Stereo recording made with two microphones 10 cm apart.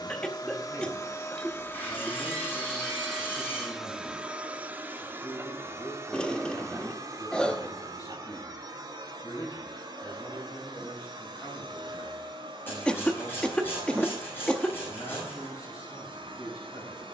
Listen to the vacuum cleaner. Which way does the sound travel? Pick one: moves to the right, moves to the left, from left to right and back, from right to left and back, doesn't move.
moves to the right.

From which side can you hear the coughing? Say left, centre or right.
centre.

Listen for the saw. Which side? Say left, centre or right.
left.